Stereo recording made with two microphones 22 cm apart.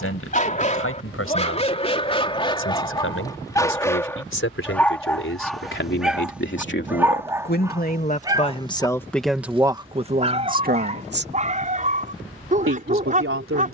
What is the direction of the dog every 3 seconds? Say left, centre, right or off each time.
left, centre, centre, right, right.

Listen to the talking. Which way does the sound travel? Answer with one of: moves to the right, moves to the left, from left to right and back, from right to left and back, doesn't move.
moves to the right.